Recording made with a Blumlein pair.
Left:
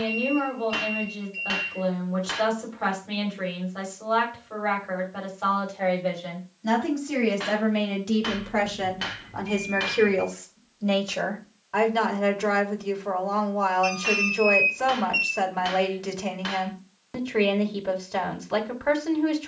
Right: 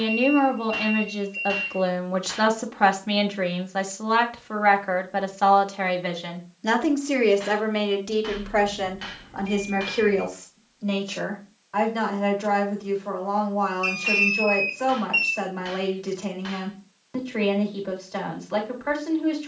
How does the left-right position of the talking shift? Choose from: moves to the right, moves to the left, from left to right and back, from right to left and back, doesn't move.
moves to the left.